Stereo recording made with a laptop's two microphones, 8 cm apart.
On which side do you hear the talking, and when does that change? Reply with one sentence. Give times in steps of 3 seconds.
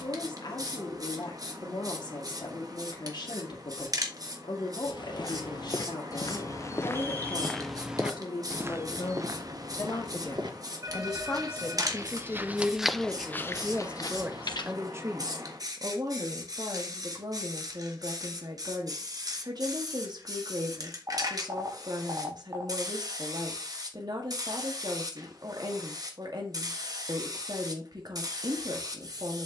In this clip you hear the talking on the left from 0 s, in the centre from 12 s and on the right from 15 s.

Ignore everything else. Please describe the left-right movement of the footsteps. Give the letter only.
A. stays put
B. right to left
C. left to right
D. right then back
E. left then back
D.